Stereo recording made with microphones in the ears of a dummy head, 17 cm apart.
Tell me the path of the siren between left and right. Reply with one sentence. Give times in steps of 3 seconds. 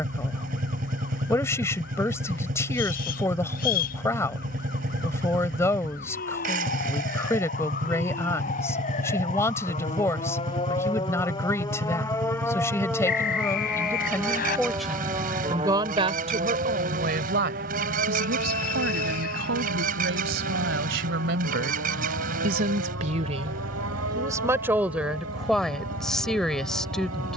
You can hear the siren on the left from 0 s, in the centre from 12 s and on the right from 15 s.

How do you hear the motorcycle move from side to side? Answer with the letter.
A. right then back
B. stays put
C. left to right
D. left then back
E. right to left
B.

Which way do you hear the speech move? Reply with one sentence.
In this clip you hear the speech move from left to right and back again.